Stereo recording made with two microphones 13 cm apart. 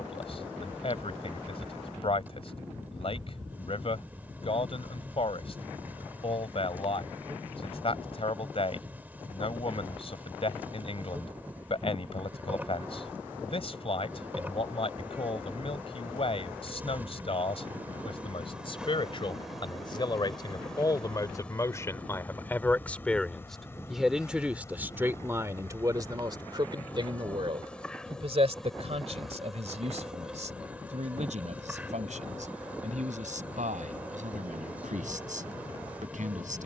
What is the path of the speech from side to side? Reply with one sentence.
In this clip you hear the speech go from the left side to the right.